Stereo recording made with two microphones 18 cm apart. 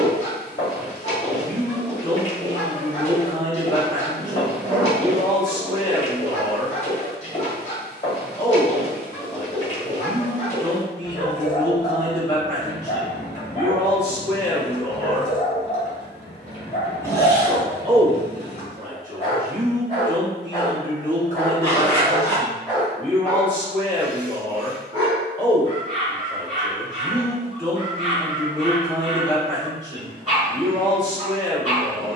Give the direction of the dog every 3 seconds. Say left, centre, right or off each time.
left, left, left, left, left, left, left, centre, right, right, right.